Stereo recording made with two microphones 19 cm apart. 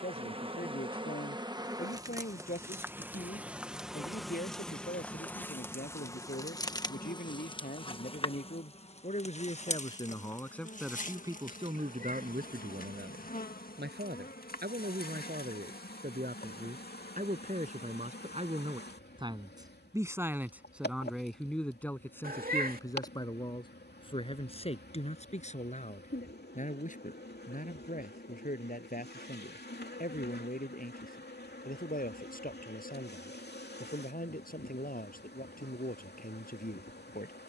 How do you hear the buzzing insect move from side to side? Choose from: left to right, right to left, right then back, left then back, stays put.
right to left.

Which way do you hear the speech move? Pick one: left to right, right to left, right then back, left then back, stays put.
right then back.